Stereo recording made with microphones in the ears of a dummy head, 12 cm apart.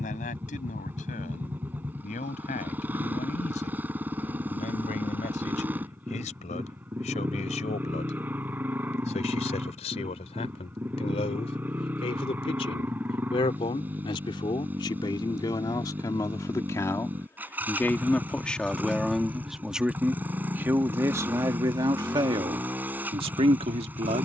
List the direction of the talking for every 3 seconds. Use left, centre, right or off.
left, left, left, left, left, left, centre, right.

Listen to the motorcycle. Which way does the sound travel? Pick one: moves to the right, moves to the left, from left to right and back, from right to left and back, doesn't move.
doesn't move.